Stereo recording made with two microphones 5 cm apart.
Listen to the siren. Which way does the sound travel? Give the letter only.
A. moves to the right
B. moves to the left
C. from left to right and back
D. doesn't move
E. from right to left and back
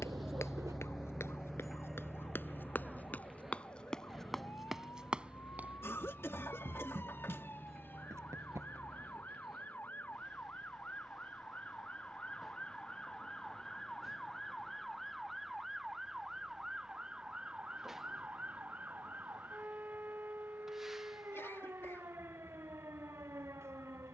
A.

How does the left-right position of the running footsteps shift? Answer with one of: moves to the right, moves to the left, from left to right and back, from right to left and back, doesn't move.
moves to the right.